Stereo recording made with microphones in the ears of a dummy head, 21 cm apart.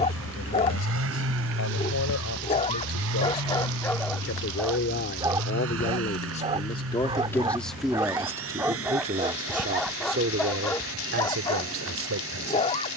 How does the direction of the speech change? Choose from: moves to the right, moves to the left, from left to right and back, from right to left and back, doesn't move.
moves to the right.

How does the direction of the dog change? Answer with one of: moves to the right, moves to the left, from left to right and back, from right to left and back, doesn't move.
from left to right and back.